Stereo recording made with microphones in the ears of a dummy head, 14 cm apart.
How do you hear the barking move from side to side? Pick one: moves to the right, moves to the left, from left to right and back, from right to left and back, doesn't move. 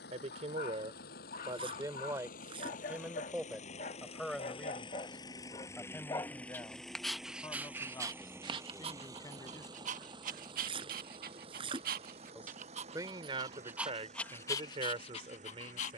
from left to right and back.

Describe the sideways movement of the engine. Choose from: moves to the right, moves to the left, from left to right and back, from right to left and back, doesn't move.
moves to the right.